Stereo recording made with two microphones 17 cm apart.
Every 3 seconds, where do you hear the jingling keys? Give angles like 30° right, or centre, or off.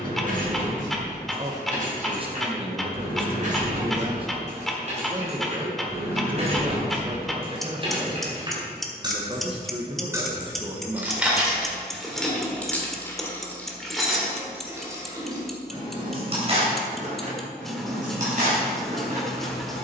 50° right, 50° right, 30° right, 10° right, centre, 40° right, 50° right.